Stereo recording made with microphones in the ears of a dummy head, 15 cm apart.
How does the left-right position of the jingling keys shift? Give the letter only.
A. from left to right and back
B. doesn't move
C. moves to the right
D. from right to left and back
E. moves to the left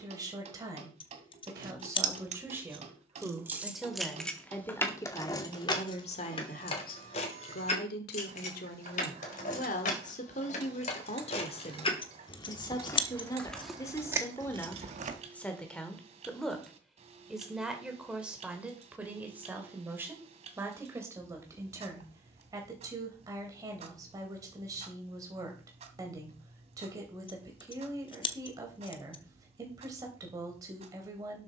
D.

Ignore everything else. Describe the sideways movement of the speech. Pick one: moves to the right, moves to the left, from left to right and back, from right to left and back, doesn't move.
from right to left and back.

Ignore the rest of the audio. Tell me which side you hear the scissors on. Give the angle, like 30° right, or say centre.
30° left.